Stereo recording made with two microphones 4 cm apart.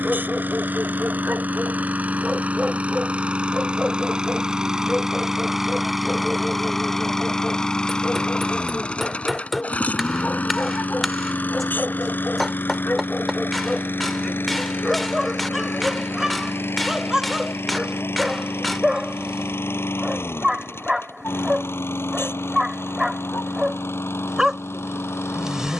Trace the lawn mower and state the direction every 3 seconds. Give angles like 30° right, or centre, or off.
40° right, 20° right, 10° left, 40° left, 50° left, 60° left, 70° left, 70° left, 80° left.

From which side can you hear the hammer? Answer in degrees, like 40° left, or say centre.
centre.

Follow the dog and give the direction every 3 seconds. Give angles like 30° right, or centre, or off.
20° right, 10° right, 10° left, 20° left, 10° left, 10° right, 10° right, 10° right, 10° right.